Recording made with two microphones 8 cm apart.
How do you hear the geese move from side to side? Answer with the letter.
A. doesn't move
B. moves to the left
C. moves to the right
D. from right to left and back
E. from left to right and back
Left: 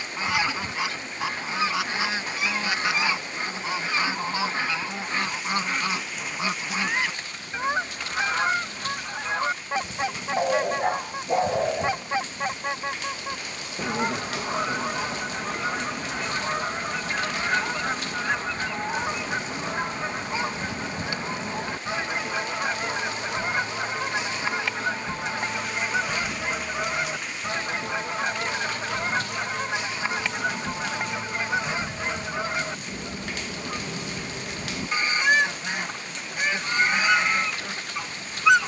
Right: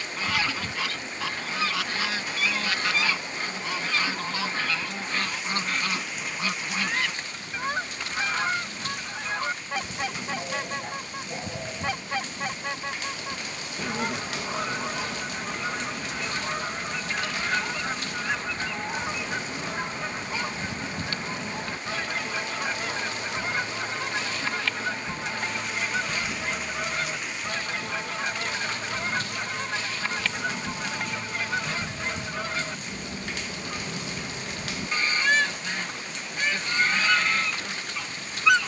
A.